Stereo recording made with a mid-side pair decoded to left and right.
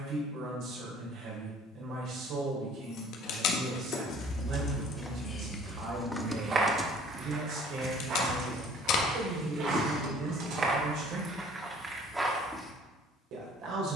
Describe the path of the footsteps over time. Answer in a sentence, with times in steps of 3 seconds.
You can hear the footsteps not at all from 0 s, in the centre from 3 s, on the right from 6 s and in the centre from 12 s.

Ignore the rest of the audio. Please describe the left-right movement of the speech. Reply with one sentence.
You can hear the speech stay in one place.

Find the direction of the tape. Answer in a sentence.
You can hear the tape on the left.